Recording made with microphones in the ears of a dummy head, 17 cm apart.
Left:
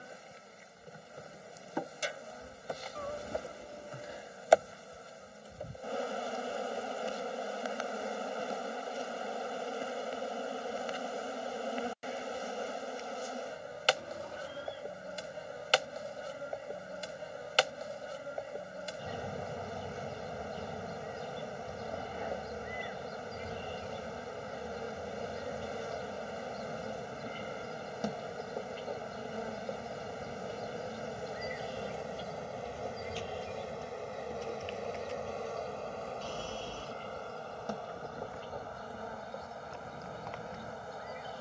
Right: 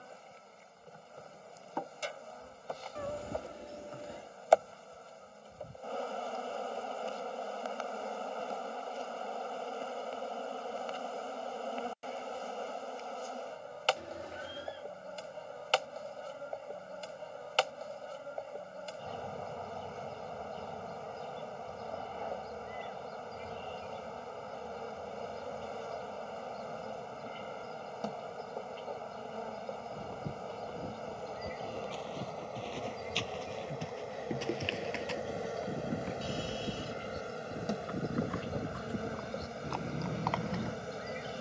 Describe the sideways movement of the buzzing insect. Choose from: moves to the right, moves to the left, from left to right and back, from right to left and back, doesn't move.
moves to the right.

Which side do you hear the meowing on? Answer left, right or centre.
right.